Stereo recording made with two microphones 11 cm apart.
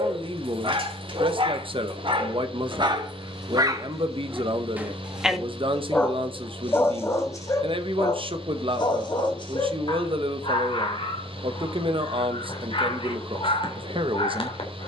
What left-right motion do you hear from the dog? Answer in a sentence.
In this clip you hear the dog travel towards the left.